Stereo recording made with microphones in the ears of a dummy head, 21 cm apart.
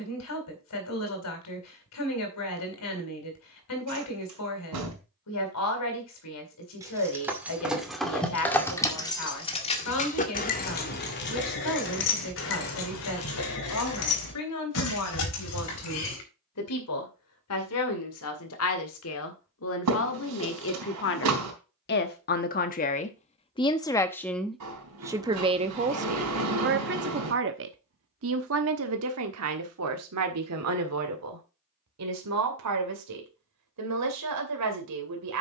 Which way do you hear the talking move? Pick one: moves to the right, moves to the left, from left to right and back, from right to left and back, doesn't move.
moves to the right.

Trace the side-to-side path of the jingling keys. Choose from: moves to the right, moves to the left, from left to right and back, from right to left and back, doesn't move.
moves to the left.